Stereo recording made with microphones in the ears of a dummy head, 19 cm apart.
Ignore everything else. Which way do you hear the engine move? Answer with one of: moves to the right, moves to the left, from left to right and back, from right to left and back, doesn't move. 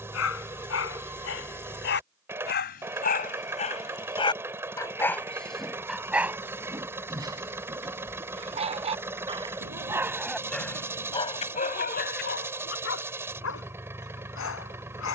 doesn't move.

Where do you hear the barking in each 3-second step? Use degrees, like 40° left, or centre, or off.
60° left, 20° left, 20° right, 10° left, 70° left.